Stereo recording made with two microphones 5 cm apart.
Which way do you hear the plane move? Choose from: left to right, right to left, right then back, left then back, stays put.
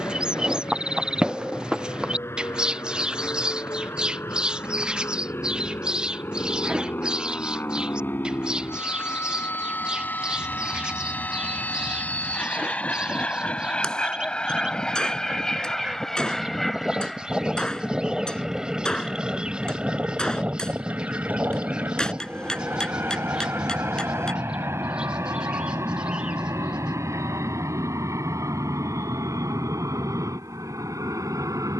left to right.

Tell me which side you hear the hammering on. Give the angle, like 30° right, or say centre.
10° left.